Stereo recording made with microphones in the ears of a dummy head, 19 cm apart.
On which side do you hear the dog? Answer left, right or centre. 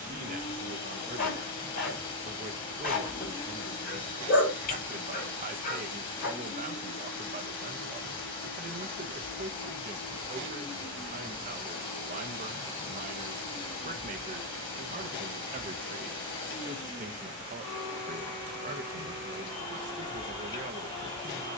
left.